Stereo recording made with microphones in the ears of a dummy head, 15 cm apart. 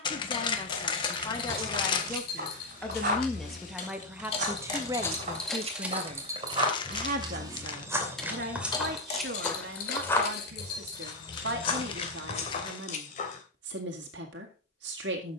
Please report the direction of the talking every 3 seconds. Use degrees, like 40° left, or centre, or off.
20° left, 10° right, 60° right, 70° right, 70° right.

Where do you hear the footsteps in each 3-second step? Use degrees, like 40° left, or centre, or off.
50° right, 40° right, 20° right, 20° left, 40° left.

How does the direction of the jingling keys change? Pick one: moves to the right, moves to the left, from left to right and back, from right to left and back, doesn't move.
from left to right and back.